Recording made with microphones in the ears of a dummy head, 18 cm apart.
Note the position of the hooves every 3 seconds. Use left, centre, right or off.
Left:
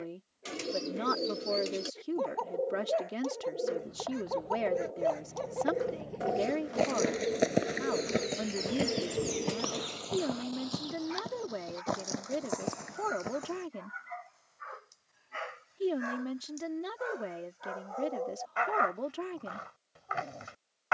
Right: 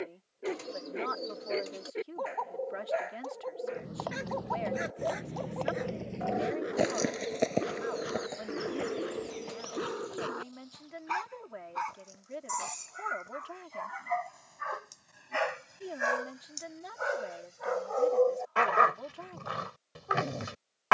off, right, centre, left, left, off, off.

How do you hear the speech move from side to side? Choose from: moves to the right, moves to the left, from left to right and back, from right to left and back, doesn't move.
doesn't move.